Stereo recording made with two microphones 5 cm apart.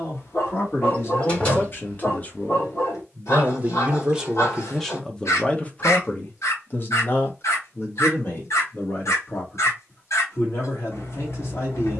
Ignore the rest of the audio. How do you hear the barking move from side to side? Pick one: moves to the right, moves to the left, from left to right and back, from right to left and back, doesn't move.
doesn't move.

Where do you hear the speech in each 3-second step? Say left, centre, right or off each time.
left, centre, left, left.